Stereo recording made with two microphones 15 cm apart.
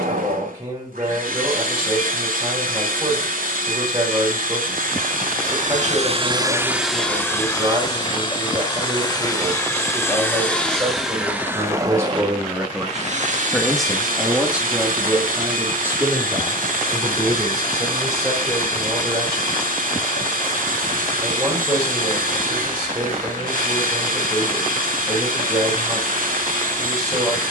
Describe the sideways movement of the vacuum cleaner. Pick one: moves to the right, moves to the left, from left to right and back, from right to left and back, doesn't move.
from right to left and back.